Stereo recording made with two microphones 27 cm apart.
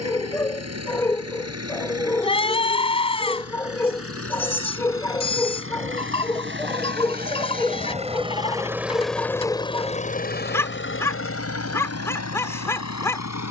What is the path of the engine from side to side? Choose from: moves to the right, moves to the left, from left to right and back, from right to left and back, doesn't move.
moves to the left.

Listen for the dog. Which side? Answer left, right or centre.
centre.